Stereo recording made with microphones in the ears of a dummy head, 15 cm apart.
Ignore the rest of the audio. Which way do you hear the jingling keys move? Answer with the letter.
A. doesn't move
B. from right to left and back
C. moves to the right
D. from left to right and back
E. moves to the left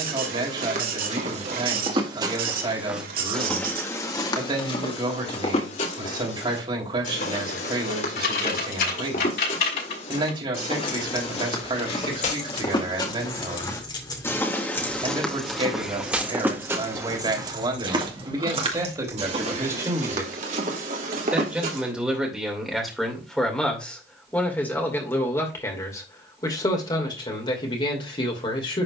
C.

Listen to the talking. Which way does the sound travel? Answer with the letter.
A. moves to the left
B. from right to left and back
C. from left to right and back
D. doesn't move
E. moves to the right
A.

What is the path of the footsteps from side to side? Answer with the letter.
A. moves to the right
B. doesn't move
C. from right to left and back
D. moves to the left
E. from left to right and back
C.